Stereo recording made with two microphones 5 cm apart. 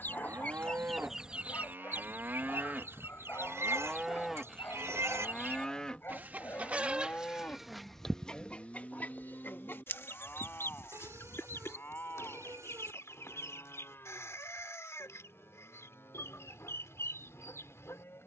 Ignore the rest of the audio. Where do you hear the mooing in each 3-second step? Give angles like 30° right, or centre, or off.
50° right, centre, 30° left, 40° left, 50° left, 60° left.